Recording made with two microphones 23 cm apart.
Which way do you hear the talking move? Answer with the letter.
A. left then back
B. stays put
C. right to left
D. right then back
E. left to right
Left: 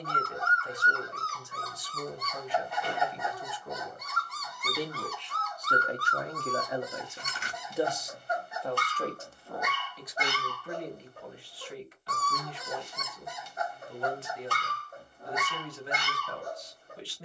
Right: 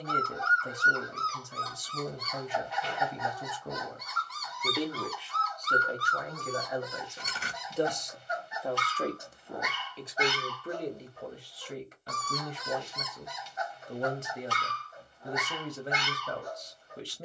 A.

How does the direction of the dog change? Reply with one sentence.
In this clip you hear the dog stay in one place.